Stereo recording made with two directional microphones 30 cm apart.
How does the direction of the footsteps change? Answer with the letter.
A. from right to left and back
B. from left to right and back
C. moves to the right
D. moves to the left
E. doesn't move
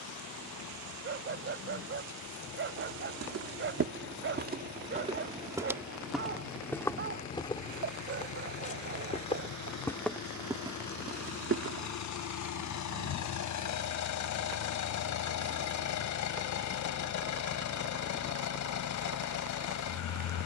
A.